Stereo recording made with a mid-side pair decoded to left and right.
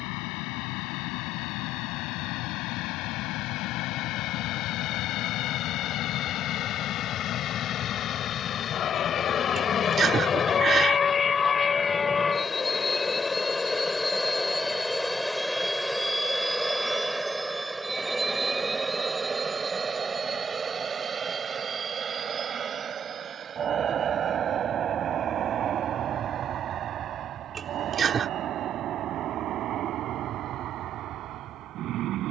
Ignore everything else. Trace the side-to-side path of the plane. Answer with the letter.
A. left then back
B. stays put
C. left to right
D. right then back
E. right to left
C.